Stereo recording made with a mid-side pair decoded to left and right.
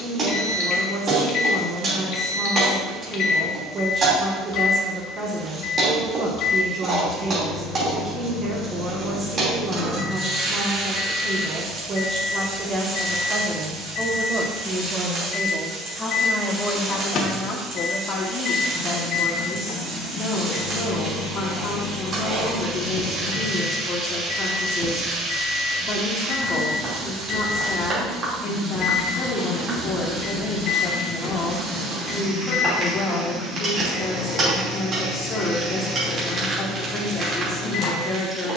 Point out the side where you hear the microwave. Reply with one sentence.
You can hear the microwave on the left.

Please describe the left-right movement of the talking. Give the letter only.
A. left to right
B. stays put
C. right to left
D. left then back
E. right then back
C.